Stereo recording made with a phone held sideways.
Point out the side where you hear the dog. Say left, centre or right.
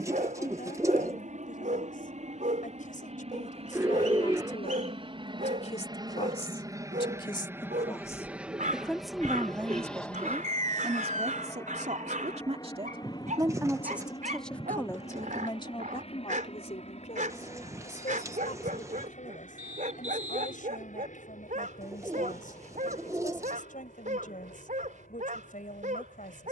right.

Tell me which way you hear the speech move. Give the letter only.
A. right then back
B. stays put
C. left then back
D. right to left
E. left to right
A.